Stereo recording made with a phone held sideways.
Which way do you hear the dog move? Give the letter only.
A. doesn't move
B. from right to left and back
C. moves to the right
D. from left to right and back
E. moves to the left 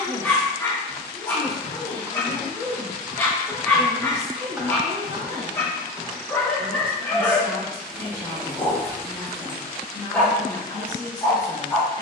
A.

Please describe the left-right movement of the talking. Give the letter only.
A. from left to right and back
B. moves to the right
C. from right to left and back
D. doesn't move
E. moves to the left
A.